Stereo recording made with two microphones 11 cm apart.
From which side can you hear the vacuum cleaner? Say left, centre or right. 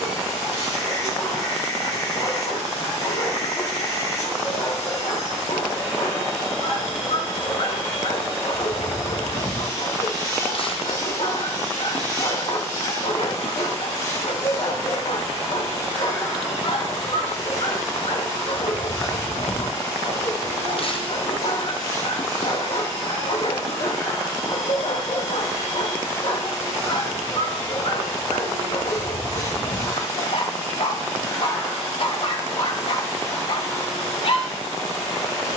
left.